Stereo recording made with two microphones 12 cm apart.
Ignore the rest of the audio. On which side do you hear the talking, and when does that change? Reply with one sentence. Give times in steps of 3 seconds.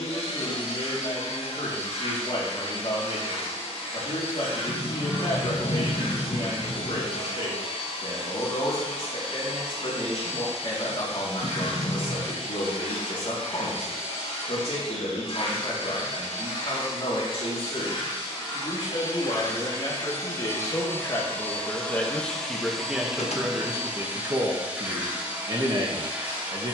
In this clip you hear the talking on the left from 0 s, in the centre from 21 s and on the right from 24 s.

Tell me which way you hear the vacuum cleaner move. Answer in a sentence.
You can hear the vacuum cleaner move to the right.